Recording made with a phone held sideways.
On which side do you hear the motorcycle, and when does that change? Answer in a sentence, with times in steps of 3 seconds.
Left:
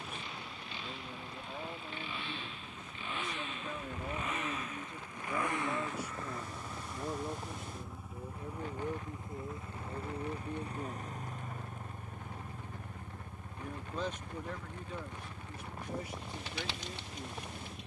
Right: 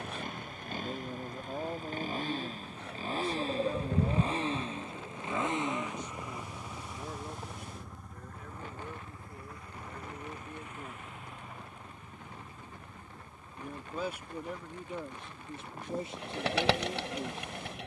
In this clip you hear the motorcycle on the right from 0 s, in the centre from 6 s and on the left from 9 s.